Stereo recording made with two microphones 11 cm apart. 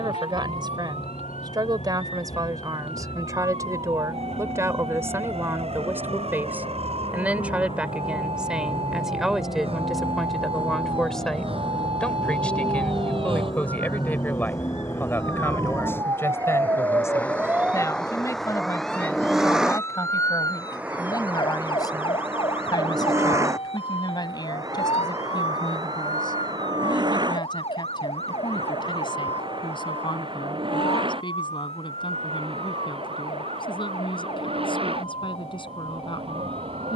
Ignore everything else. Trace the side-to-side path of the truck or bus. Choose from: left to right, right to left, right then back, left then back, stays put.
left to right.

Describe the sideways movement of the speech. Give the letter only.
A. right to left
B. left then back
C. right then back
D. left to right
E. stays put
A.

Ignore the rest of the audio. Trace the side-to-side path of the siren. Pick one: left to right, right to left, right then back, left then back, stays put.
right to left.